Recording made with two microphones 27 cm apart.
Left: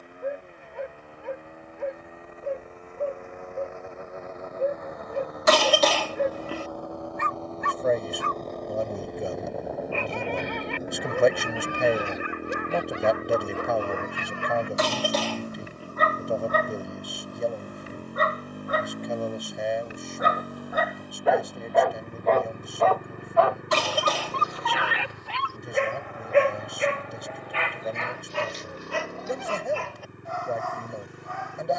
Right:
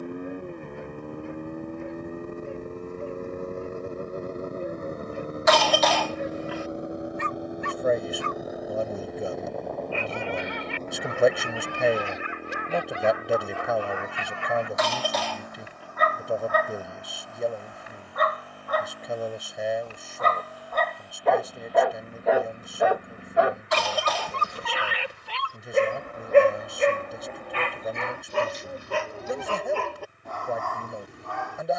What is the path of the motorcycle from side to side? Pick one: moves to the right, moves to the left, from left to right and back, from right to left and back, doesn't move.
moves to the left.